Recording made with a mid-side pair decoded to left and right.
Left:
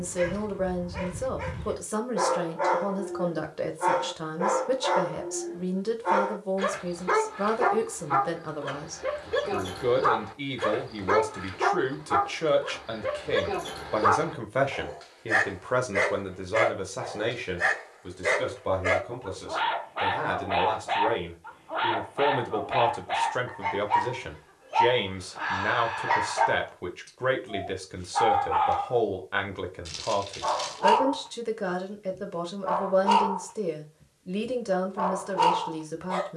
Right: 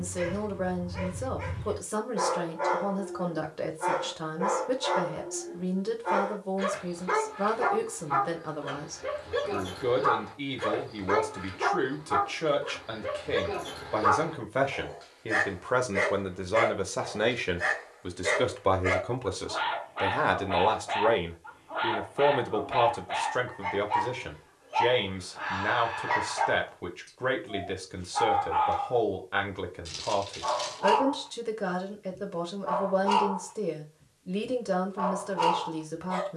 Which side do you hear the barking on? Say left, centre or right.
left.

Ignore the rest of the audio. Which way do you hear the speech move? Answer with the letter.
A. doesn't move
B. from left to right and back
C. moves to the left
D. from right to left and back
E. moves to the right
B.